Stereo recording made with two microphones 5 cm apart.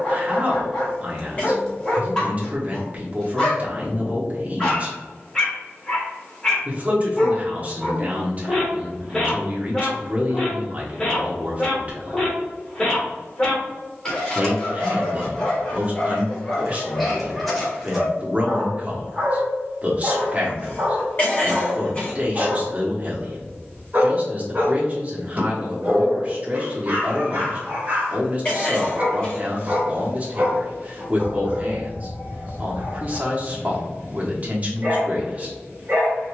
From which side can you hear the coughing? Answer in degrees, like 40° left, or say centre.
30° left.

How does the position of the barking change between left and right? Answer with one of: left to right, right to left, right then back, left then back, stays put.
left to right.